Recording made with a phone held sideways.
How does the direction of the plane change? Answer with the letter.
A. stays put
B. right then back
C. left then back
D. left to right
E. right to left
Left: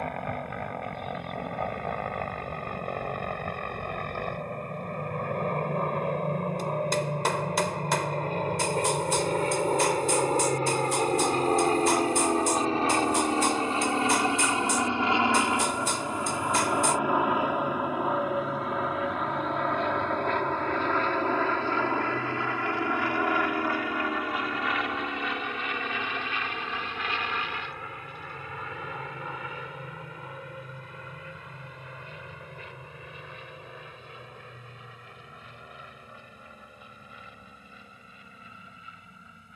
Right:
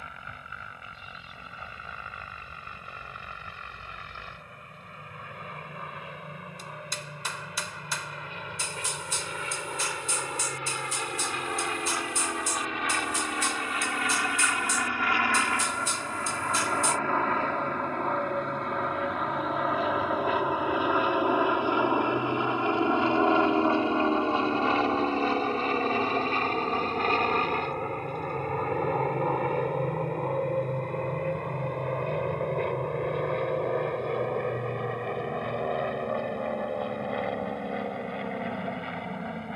D.